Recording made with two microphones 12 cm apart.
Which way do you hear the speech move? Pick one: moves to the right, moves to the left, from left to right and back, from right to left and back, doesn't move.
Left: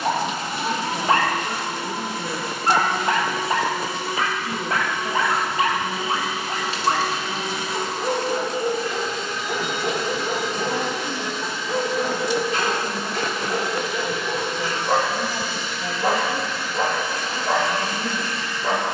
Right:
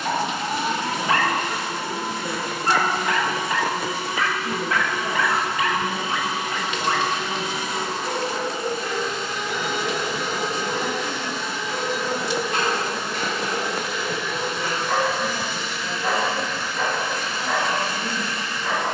from left to right and back.